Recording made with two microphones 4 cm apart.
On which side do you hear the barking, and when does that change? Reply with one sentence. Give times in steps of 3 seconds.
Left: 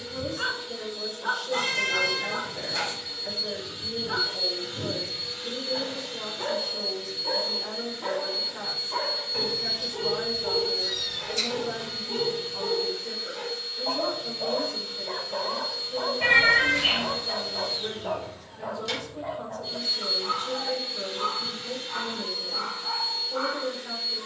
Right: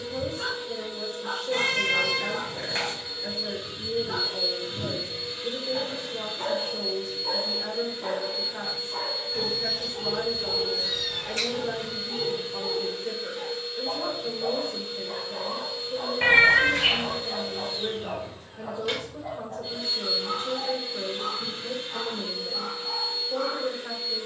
You can hear the barking on the left from 0 s, in the centre from 3 s and on the left from 9 s.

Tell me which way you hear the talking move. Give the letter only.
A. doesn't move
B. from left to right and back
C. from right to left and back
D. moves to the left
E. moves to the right
A.